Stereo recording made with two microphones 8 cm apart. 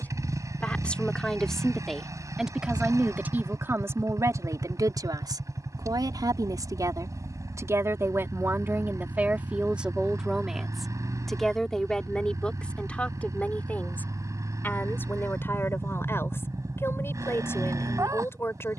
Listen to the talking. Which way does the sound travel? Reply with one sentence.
In this clip you hear the talking go right and come back.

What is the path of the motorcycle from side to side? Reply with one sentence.
In this clip you hear the motorcycle stay in one place.